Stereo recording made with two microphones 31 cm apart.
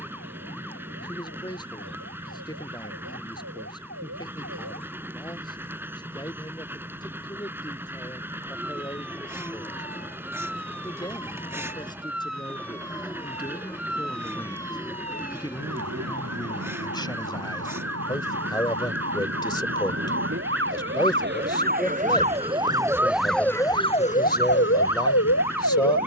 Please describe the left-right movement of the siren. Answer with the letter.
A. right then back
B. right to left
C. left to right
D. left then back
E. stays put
B.